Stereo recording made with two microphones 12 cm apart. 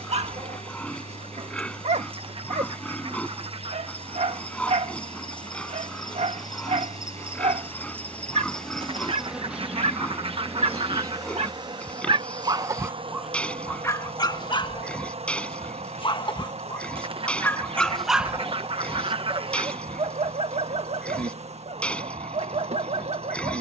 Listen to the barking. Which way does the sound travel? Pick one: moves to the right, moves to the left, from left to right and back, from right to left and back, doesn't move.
from right to left and back.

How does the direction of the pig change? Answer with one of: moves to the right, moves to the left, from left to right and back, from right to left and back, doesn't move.
doesn't move.